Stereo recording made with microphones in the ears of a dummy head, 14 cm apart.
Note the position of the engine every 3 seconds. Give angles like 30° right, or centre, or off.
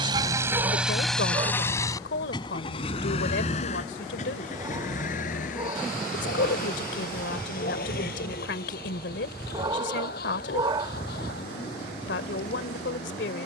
10° left, 50° left, 60° left, 60° left, 70° left.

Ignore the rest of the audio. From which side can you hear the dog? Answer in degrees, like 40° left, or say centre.
30° right.